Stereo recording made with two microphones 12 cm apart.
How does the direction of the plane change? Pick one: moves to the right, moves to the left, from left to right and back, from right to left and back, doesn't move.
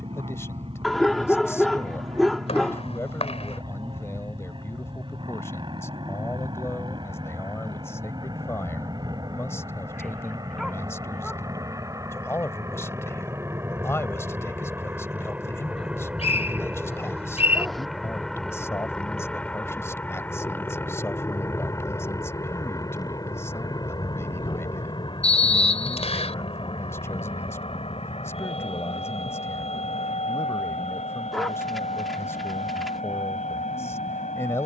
moves to the left.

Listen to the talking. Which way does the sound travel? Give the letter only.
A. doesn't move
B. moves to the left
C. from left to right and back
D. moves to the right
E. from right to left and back
A.